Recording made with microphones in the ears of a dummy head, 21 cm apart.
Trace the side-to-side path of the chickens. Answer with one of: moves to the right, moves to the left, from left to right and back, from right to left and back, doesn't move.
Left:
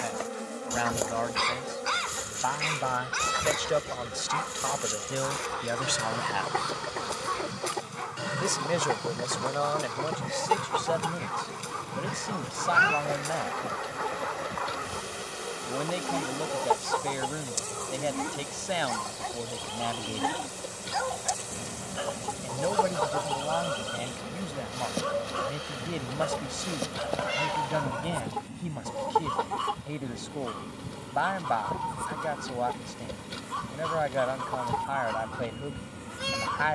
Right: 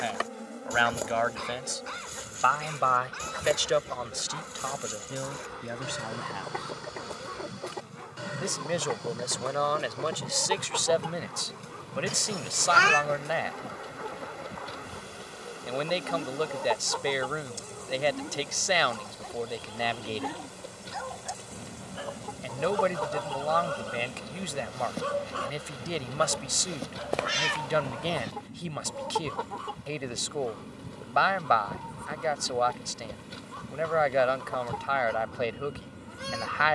doesn't move.